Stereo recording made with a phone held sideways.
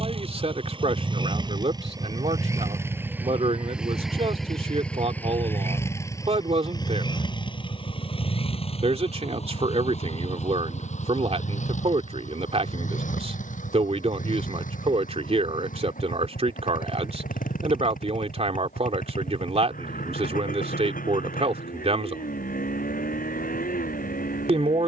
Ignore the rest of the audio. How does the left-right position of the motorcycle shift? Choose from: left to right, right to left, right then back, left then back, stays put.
right to left.